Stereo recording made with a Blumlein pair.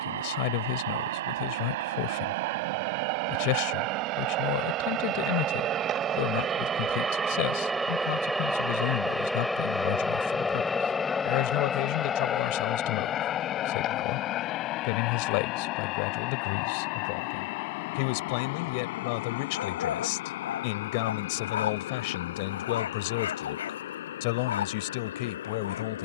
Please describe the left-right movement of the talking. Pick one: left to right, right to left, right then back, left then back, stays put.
stays put.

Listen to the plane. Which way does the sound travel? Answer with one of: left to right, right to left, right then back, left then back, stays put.
right to left.